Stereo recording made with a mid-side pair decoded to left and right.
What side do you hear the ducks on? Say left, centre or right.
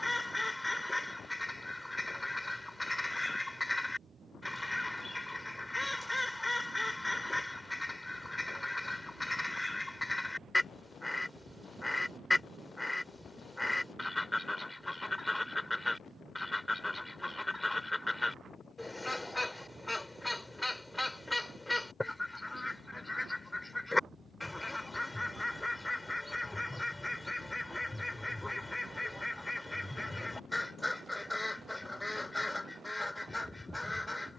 centre.